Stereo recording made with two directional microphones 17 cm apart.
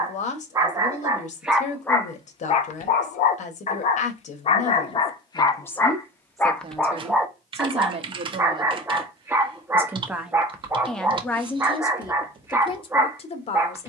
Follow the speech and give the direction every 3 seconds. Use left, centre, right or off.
left, left, right, centre, left.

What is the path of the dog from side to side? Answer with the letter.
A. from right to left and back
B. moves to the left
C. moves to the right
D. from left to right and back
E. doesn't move
A.